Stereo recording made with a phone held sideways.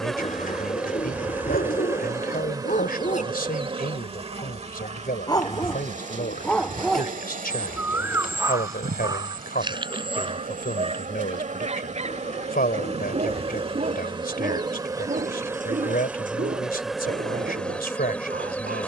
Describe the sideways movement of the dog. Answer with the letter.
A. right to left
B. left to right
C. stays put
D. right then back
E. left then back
B.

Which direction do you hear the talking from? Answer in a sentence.
In this clip you hear the talking on the left.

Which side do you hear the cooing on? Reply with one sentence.
You can hear the cooing on the left.